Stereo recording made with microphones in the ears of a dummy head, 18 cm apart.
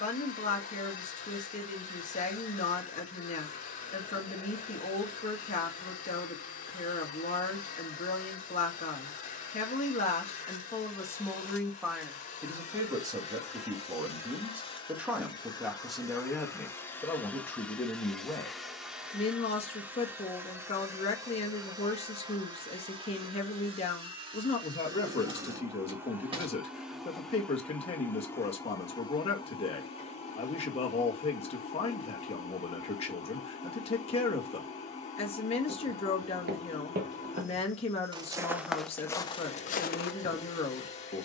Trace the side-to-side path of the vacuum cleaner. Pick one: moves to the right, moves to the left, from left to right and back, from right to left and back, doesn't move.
from left to right and back.